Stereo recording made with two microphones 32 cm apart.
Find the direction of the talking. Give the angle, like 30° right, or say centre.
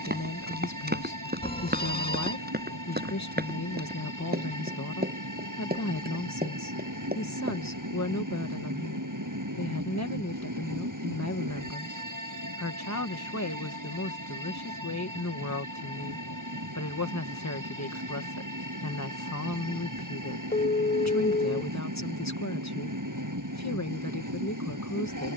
60° left.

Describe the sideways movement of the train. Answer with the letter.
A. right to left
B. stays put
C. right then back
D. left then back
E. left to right
B.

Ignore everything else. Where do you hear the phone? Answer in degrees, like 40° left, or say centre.
30° left.